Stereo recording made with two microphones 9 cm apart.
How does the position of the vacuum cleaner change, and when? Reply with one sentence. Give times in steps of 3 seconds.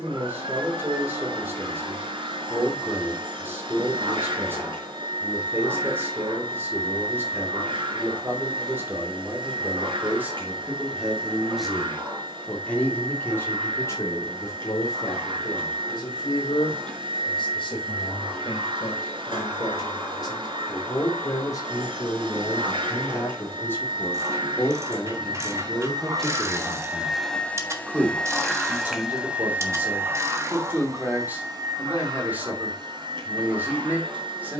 You can hear the vacuum cleaner on the right from 0 s, in the centre from 27 s and on the right from 30 s.